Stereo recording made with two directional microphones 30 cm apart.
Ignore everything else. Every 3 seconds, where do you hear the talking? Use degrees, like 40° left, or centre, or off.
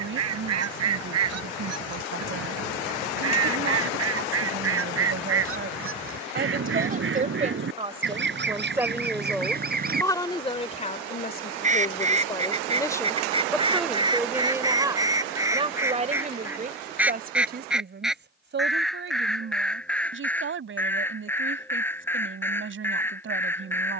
40° right, 40° right, 20° right, 20° left, centre, 30° right, 40° right, 40° right.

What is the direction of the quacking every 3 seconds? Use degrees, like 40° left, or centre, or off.
60° right, 50° right, 40° right, 30° right, 20° right, 10° right, centre, 10° left.